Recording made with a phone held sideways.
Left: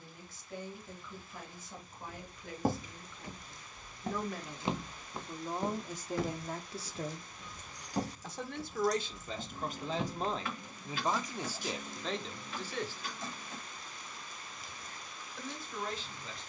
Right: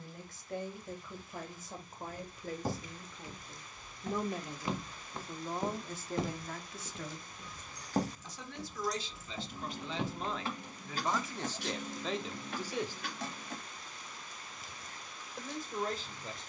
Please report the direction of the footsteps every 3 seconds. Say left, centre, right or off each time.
left, left, right, right, off, off.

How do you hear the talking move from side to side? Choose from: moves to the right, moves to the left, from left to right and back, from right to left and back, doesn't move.
from right to left and back.